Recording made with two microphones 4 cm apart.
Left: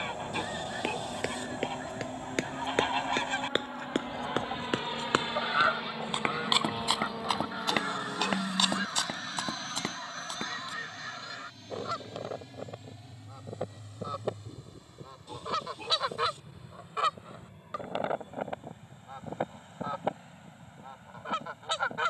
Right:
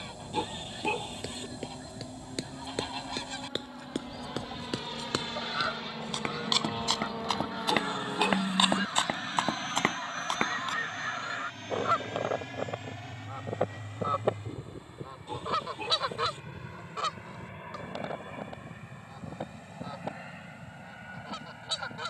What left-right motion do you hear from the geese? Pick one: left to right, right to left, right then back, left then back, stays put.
right then back.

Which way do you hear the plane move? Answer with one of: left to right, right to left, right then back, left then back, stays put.
left to right.